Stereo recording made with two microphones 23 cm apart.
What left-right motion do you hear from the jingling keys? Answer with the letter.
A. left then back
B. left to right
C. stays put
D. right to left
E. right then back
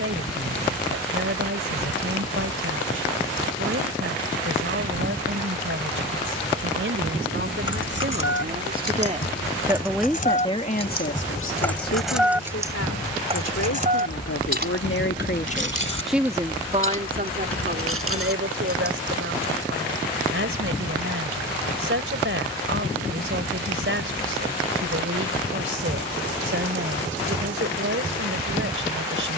B.